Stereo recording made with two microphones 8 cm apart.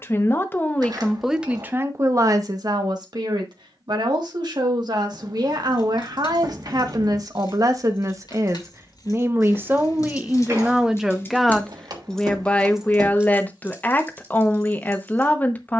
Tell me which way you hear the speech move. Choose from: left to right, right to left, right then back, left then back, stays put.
right then back.